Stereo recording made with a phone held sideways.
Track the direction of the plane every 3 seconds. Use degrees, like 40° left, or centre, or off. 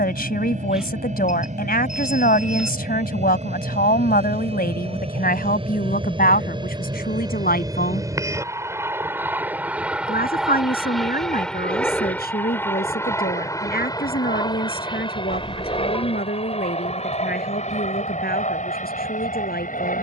50° right, 40° right, 20° right, centre, 20° left, 40° left, 50° left.